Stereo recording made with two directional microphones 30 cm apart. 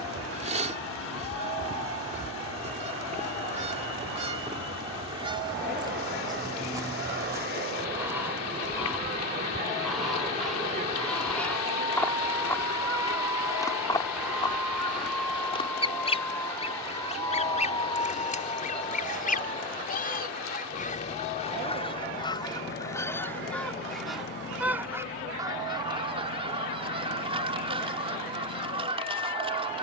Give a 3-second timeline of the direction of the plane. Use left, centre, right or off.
right, right, right, right, centre, centre, left, left, left, left.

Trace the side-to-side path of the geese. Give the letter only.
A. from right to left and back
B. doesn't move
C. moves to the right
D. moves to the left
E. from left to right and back
A.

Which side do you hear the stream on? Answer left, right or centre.
left.